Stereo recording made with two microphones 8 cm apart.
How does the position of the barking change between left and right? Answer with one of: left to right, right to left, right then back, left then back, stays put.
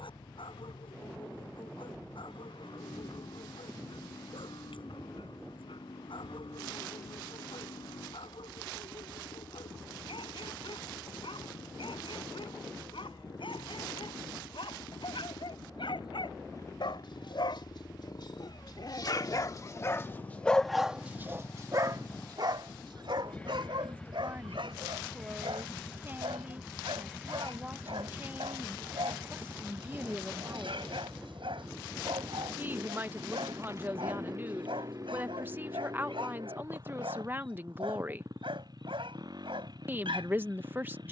left to right.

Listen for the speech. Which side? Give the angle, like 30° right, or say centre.
20° right.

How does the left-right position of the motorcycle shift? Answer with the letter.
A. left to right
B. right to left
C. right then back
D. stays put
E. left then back
A.